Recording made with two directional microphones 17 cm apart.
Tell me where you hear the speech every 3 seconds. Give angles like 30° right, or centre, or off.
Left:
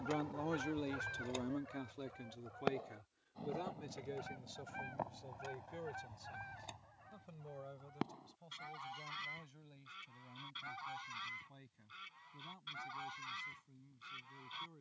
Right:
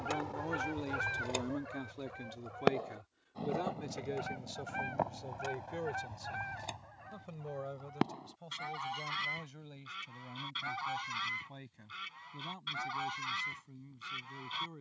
10° right, 40° right, 50° right, 60° right, 60° right.